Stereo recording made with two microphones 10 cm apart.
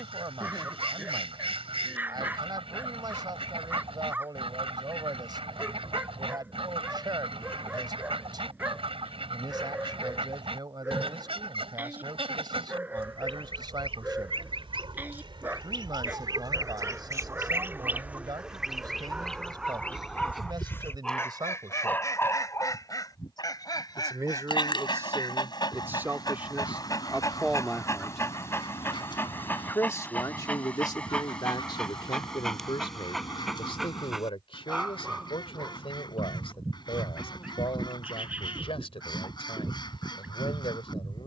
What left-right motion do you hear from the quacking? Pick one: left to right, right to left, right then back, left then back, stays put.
right to left.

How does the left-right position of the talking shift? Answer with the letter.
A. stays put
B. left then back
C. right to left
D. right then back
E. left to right
C.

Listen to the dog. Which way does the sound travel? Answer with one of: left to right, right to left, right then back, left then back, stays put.
left then back.